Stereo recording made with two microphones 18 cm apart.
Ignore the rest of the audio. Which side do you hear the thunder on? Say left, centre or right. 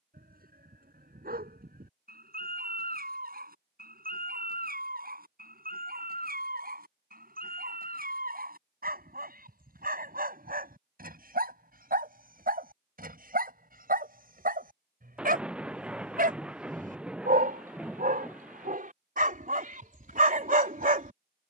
centre.